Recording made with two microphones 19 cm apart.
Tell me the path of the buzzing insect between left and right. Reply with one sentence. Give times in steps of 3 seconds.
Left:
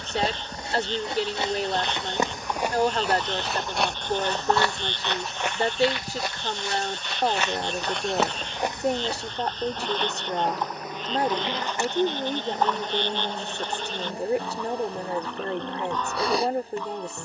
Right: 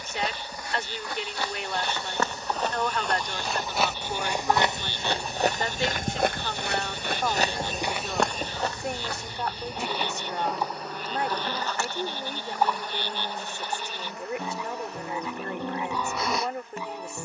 In this clip you hear the buzzing insect on the left from 0 s, in the centre from 3 s, on the right from 6 s, in the centre from 9 s and on the left from 12 s.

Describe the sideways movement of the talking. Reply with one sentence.
In this clip you hear the talking stay put.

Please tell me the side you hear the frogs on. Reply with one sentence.
You can hear the frogs in the centre.